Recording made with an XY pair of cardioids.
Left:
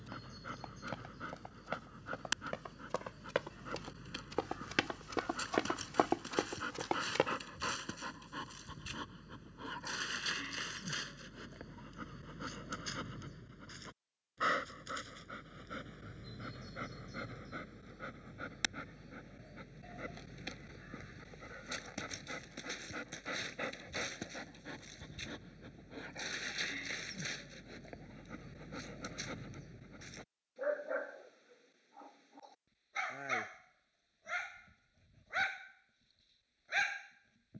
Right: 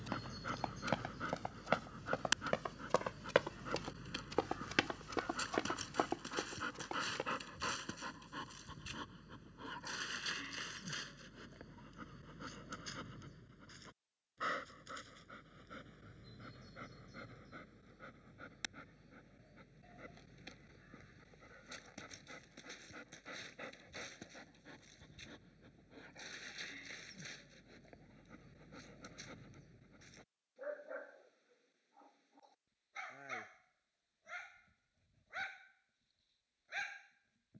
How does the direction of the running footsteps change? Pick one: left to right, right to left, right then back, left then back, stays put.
right to left.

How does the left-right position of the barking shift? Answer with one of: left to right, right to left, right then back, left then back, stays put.
right to left.